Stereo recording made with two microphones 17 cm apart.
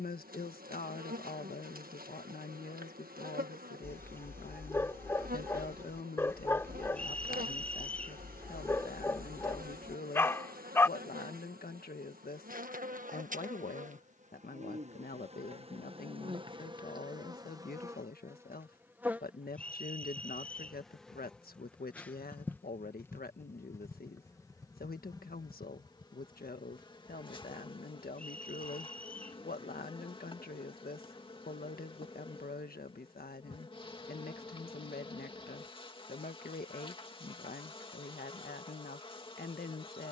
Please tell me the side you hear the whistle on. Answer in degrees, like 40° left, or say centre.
10° left.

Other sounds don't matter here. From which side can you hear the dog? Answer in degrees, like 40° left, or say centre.
10° left.